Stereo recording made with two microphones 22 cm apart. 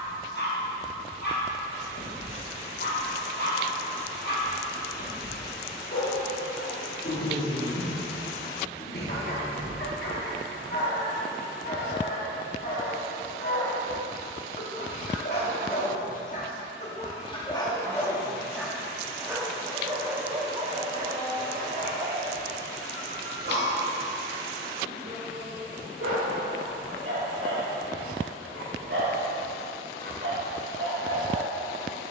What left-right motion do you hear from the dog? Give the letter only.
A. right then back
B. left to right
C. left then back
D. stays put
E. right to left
B.